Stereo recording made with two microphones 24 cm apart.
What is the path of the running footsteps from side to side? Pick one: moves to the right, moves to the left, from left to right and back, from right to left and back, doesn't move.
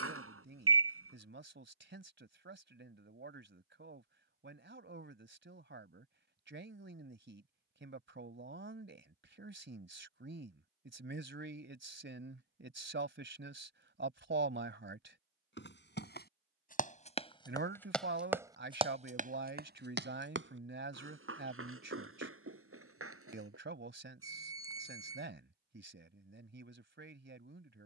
moves to the right.